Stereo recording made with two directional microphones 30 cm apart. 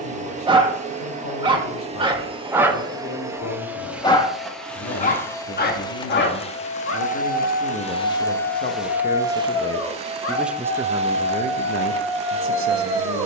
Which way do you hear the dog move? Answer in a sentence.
You can hear the dog go left and come back.